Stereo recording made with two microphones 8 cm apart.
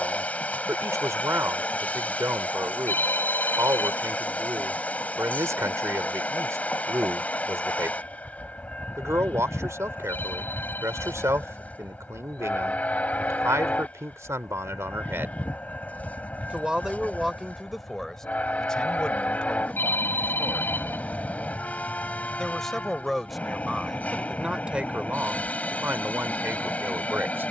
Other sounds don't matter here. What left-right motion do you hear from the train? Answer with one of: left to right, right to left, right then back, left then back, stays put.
stays put.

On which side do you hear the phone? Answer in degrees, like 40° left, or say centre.
30° left.